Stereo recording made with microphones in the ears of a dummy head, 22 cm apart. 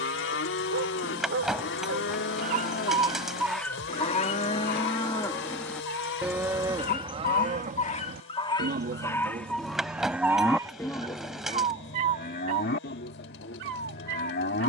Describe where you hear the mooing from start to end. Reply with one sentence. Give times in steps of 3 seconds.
You can hear the mooing on the left from 0 s, on the right from 6 s, in the centre from 9 s and on the left from 12 s.